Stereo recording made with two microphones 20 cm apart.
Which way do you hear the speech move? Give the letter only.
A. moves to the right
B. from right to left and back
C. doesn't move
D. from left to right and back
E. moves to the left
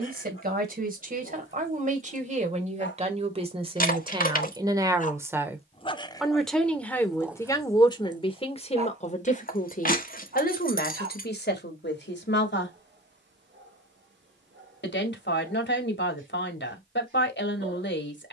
E.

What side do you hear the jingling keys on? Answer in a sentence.
In this clip you hear the jingling keys on the left.